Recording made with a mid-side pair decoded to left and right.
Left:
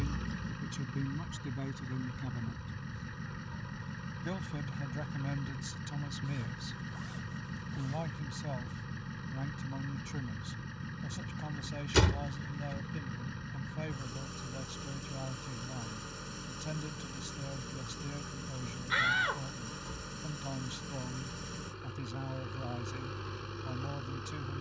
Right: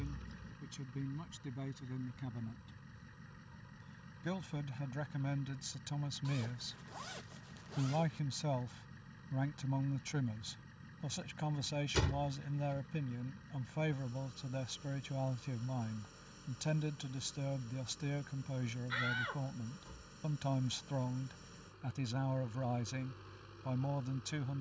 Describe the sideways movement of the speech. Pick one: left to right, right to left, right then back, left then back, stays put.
left to right.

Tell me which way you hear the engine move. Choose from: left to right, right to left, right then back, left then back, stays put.
stays put.